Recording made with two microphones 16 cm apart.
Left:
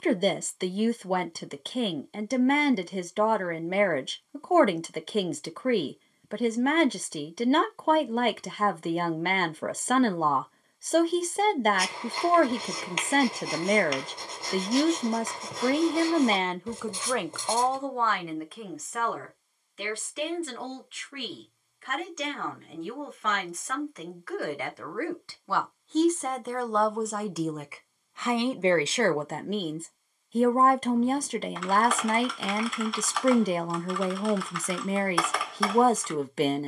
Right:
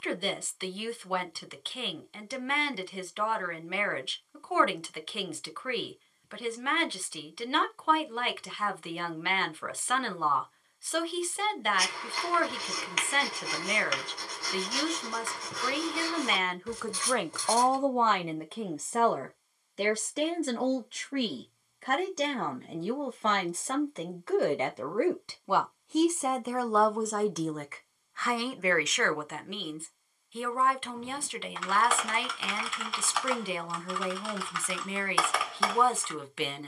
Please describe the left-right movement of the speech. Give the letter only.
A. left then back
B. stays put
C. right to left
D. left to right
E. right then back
E.